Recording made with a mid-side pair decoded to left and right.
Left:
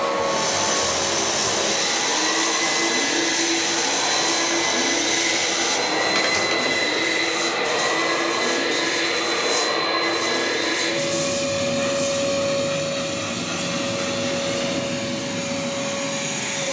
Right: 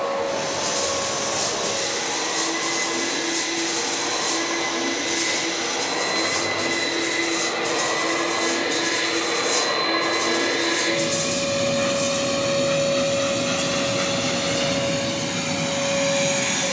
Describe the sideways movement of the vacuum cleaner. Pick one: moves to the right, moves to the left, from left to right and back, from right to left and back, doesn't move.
moves to the right.